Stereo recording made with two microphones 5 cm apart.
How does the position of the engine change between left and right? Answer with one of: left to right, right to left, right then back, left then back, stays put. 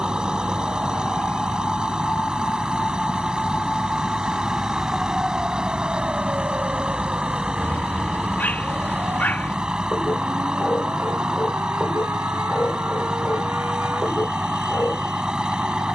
stays put.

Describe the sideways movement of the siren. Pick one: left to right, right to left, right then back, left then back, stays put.
left to right.